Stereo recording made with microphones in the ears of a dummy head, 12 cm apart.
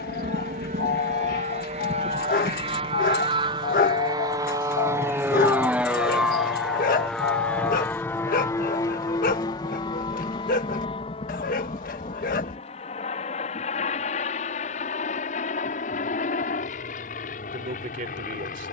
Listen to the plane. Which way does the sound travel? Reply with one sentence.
In this clip you hear the plane move from right to left.